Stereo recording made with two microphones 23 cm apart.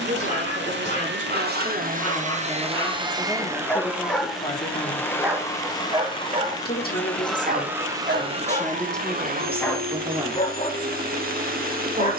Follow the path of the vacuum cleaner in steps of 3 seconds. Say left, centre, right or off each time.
right, centre, centre, right.